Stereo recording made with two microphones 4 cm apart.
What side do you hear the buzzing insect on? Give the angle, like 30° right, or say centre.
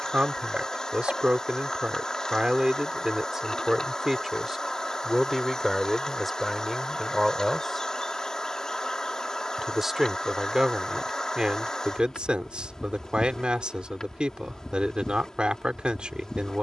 10° left.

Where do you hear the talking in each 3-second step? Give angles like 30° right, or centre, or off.
20° right, 10° right, centre, 10° right, 20° right, 20° right.